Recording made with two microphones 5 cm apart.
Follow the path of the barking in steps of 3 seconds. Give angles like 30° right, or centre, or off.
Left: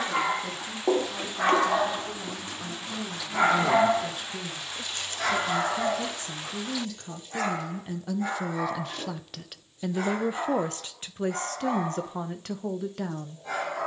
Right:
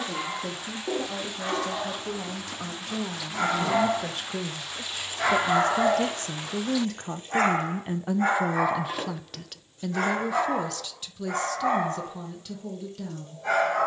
50° left, centre, 40° right, 60° right, 60° right.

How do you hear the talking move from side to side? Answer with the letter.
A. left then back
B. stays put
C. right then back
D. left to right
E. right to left
E.